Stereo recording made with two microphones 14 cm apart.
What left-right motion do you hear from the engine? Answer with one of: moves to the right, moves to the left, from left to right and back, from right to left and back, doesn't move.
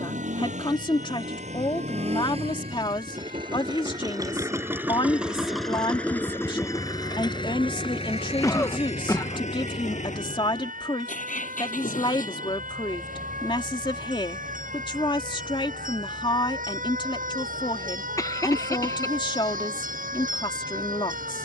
moves to the left.